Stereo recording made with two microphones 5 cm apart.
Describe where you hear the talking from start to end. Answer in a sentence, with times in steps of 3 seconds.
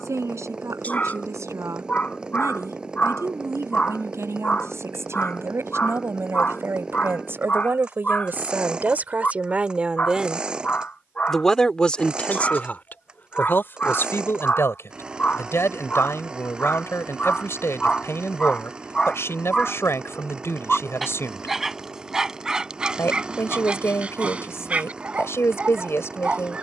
In this clip you hear the talking on the right from 0 s, in the centre from 9 s and on the left from 12 s.